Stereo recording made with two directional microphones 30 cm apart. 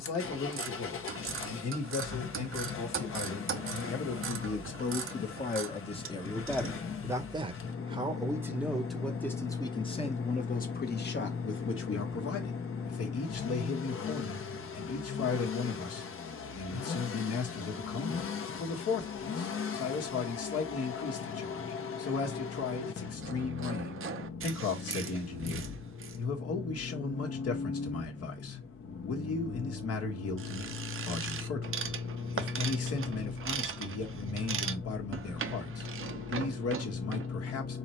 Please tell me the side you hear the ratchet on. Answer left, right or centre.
right.